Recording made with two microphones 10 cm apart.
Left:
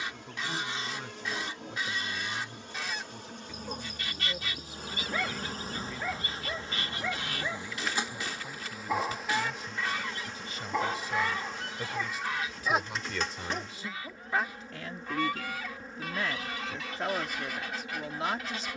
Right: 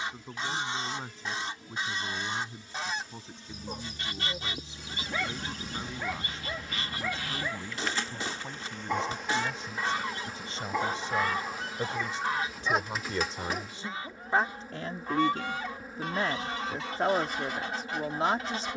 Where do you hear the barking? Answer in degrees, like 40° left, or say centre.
centre.